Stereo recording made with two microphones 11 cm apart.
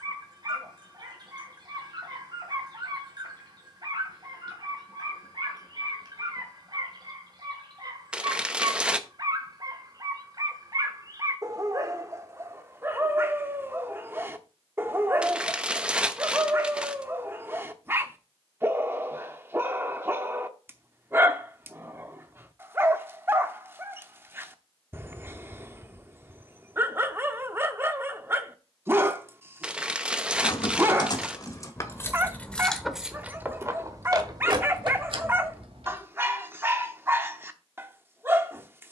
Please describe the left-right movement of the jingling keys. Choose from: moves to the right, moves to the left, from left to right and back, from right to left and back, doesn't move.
moves to the right.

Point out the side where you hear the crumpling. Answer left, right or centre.
centre.